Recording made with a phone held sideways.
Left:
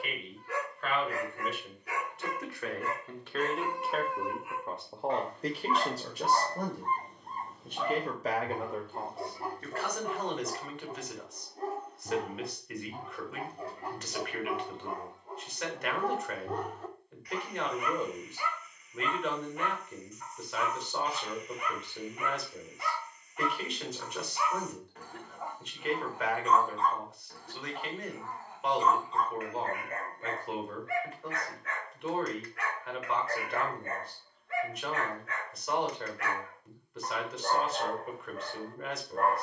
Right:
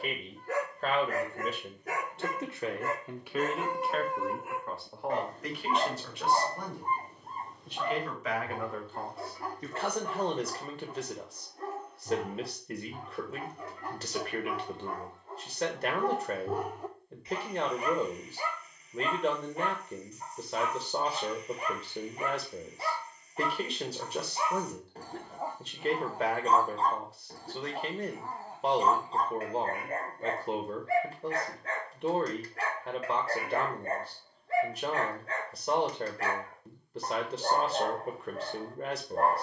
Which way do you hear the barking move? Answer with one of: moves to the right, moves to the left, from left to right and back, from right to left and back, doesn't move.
from right to left and back.